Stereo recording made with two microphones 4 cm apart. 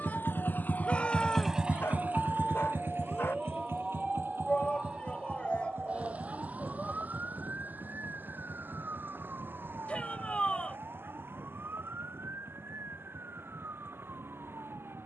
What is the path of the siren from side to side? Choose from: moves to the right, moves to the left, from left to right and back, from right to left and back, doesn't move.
moves to the right.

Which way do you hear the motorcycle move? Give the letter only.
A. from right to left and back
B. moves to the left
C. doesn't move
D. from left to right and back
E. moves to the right
E.